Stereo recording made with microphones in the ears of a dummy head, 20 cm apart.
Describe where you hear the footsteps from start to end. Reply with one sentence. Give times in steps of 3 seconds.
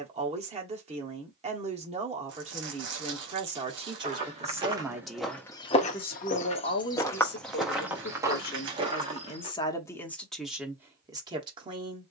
In this clip you hear the footsteps not at all from 0 s, in the centre from 3 s and on the right from 9 s.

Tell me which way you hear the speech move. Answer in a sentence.
You can hear the speech go left and come back.